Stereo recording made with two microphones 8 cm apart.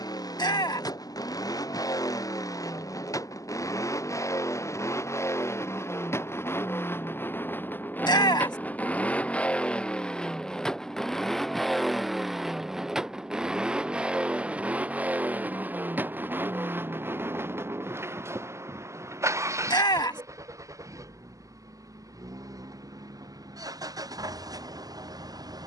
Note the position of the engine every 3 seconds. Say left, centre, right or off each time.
left, left, left, centre, centre, right, right, right, right.